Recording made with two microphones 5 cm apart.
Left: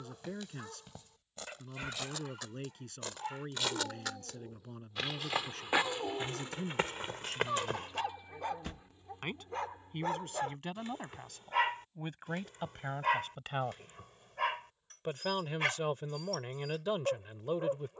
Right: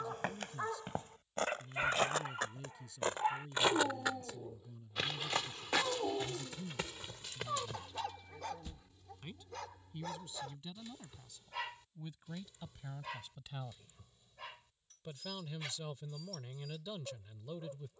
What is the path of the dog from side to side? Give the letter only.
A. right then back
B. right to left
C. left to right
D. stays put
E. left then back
B.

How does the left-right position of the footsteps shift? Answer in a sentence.
In this clip you hear the footsteps move from right to left.